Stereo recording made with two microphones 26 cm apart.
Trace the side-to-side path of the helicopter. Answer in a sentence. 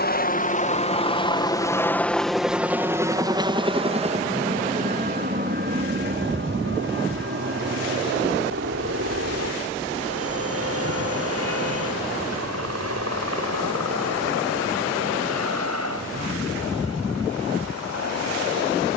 You can hear the helicopter go from the left side to the right.